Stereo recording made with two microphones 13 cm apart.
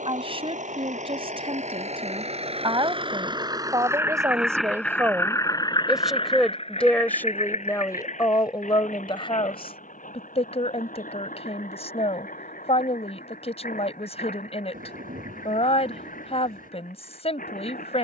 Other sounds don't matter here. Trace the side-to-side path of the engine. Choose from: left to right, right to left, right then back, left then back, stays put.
right to left.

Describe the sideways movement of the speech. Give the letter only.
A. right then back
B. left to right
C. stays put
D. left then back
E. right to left
E.